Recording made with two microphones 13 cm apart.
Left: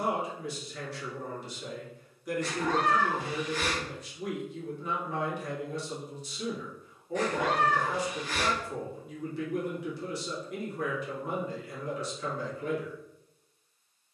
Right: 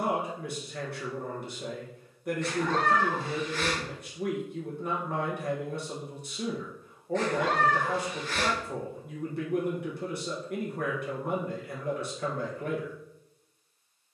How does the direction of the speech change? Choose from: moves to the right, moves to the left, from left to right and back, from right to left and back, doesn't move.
doesn't move.